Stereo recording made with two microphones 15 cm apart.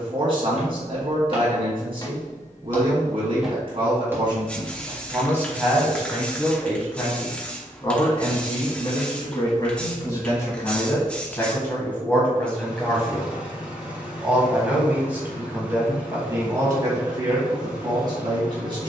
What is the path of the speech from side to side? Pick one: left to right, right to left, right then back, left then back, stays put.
left then back.